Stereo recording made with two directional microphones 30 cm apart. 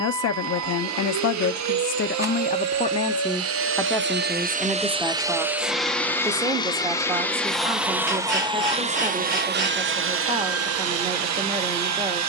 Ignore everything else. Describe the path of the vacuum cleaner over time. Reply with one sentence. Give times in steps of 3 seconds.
You can hear the vacuum cleaner on the right from 0 s, in the centre from 6 s and on the right from 9 s.